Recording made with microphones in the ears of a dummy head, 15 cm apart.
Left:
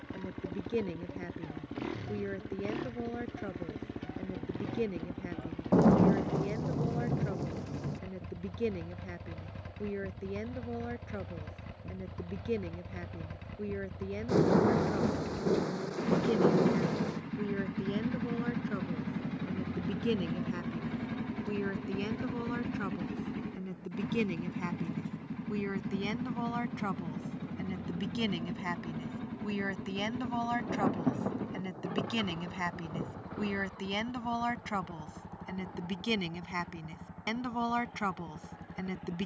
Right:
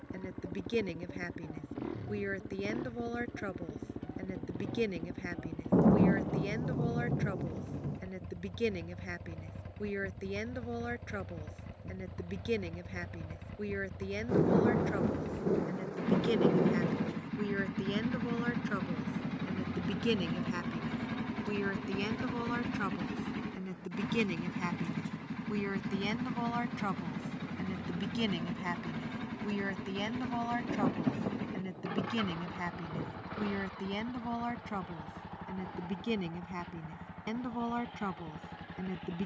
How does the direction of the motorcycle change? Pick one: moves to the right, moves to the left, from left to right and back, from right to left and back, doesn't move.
moves to the right.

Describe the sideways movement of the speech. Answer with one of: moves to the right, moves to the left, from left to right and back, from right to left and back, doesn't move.
moves to the left.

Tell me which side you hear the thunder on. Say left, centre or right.
left.